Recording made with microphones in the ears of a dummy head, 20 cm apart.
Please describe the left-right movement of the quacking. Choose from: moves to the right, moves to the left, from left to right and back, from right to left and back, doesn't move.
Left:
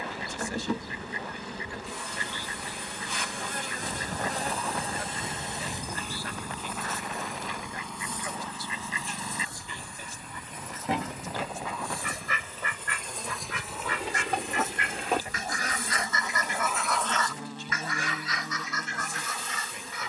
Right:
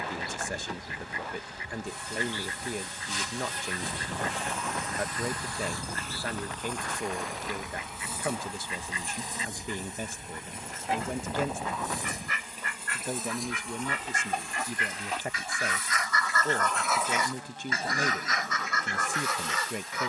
moves to the right.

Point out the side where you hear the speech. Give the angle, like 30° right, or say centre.
40° right.